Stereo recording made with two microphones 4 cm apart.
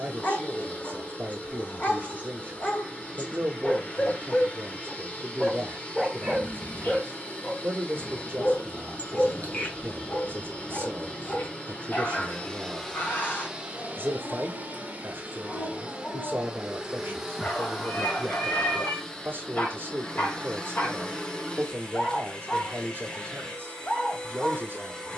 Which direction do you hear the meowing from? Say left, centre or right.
left.